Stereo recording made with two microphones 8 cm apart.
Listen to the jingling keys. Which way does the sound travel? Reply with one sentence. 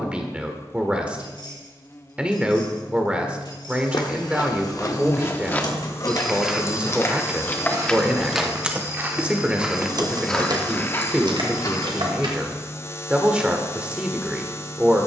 You can hear the jingling keys move to the right.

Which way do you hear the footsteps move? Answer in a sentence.
In this clip you hear the footsteps move from left to right and back again.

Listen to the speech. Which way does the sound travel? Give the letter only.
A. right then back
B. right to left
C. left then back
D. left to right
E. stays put
E.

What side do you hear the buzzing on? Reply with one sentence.
You can hear the buzzing on the left.